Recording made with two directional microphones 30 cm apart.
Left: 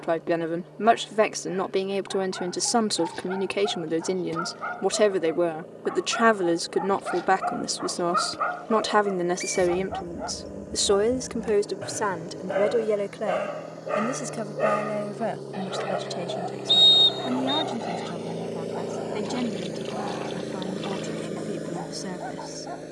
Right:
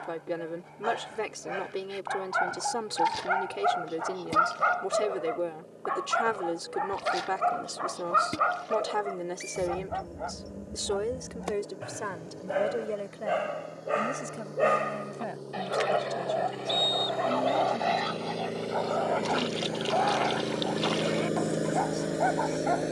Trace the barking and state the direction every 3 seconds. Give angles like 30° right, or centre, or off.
60° right, 50° right, 20° right, 10° left, 10° left, 30° right, 50° right, 60° right.